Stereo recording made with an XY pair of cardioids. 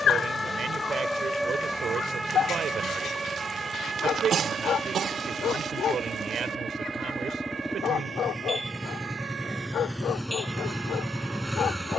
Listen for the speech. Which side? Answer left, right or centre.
right.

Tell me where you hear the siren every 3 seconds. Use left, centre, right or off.
centre, right, right, right.